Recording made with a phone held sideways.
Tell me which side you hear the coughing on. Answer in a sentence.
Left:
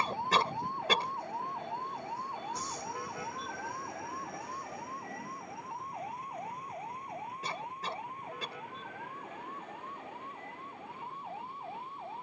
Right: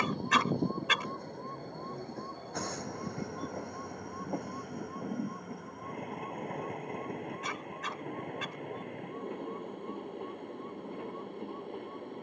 In this clip you hear the coughing on the left.